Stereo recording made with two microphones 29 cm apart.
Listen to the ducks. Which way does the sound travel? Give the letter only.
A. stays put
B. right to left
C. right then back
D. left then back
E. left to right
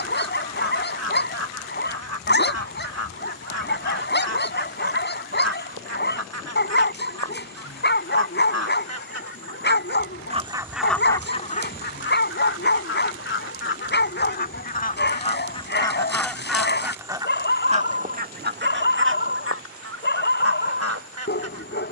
D.